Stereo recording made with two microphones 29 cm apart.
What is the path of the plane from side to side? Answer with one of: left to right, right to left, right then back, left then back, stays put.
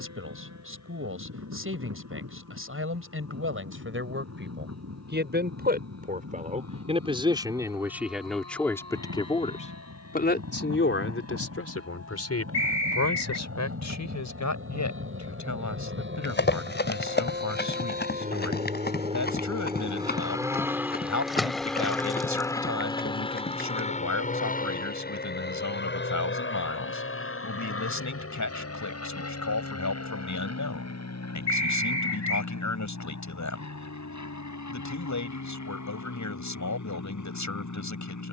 right to left.